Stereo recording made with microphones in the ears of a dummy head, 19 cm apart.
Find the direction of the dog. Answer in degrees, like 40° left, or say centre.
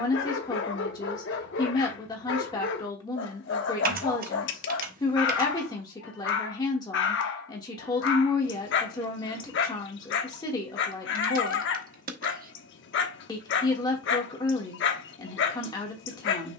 60° left.